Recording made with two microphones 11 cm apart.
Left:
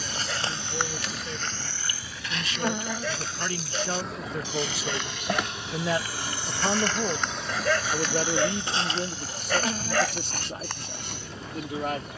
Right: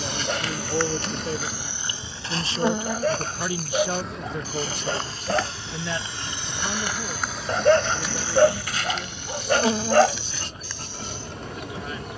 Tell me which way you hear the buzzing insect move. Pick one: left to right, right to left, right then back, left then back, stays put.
left then back.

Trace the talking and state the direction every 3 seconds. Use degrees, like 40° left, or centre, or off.
40° right, centre, 40° left, 60° left.